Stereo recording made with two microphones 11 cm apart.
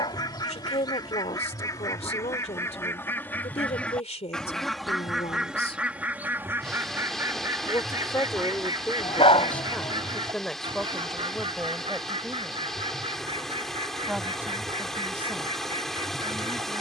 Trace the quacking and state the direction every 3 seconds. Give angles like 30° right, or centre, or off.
30° left, centre, 30° right, 50° right, 60° right, 60° right.